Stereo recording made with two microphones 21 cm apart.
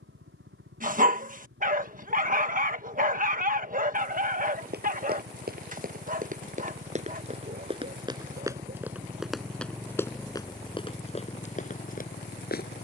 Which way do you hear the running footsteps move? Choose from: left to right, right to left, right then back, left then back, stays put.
right to left.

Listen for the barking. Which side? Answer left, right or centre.
right.